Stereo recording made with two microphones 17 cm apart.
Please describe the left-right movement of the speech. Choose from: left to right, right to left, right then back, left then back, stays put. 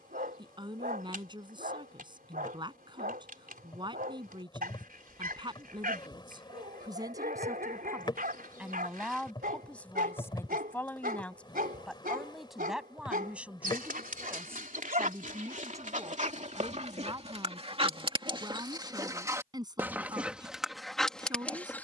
left then back.